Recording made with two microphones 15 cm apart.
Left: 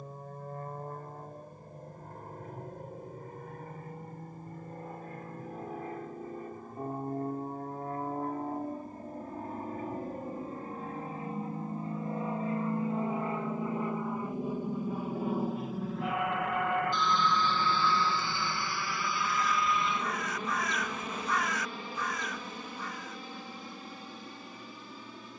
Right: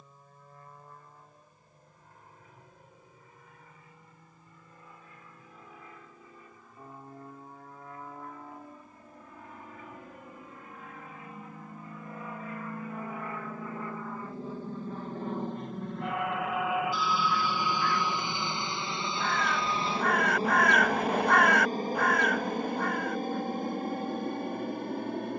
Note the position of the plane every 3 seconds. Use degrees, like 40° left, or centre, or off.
60° left, 60° left, 50° left, 40° left, 20° left, centre, 30° right, 50° right, 60° right.